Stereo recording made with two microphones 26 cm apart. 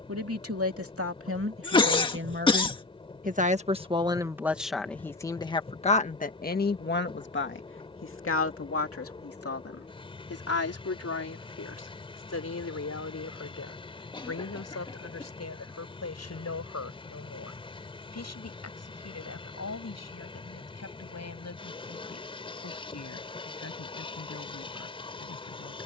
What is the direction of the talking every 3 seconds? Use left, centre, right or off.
right, centre, left, left, left, left, left, left, left.